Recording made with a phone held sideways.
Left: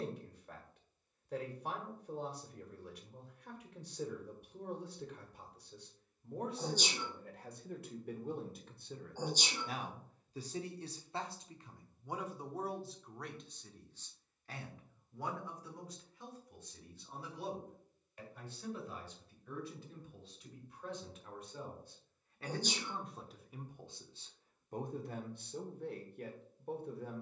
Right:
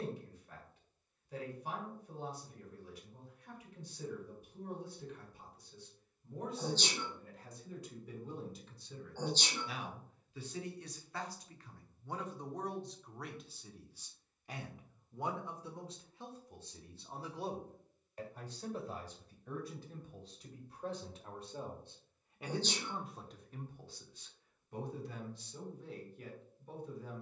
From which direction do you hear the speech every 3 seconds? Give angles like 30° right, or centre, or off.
80° left, 80° left, 70° left, 30° left, centre, 30° right, 40° right, 10° right, 50° left.